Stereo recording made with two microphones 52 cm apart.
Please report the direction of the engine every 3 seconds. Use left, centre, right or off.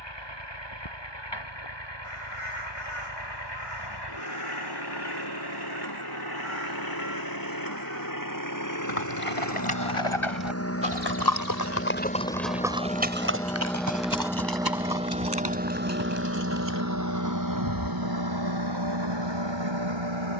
left, left, left, left, centre, right, right.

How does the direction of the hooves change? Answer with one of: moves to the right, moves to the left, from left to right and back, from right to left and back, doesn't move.
moves to the right.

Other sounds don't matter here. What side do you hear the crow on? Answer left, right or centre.
left.